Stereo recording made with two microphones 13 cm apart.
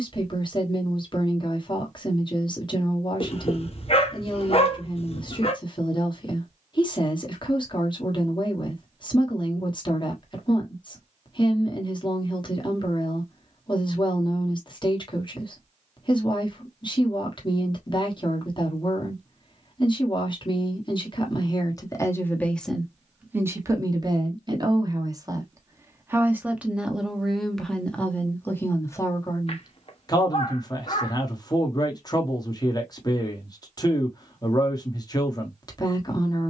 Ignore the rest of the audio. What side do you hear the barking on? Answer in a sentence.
You can hear the barking on the left.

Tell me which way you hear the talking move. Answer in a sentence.
You can hear the talking go right and come back.